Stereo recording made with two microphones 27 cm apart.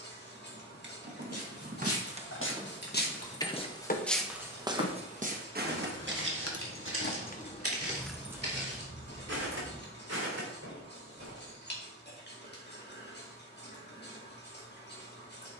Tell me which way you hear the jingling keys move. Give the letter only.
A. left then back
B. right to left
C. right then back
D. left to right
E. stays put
A.